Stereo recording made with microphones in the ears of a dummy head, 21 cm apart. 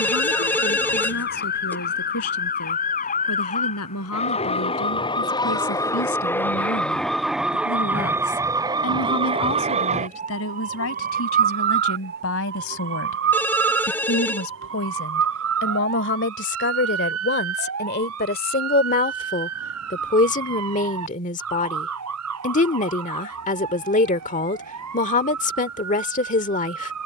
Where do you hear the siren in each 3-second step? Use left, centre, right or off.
left, left, centre, right, right, right, right, right, right.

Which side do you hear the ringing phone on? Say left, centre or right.
centre.